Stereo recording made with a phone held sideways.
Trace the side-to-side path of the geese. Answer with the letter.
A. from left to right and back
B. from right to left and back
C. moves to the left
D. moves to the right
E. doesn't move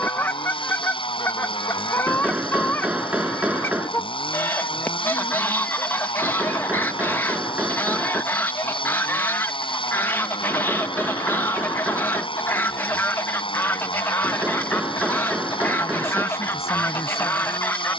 E.